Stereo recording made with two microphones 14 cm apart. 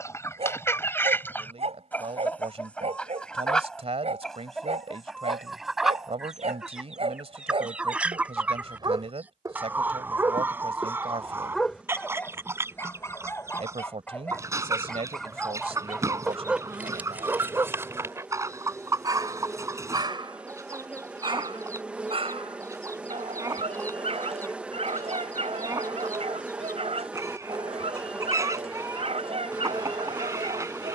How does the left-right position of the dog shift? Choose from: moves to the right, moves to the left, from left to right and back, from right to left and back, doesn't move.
from right to left and back.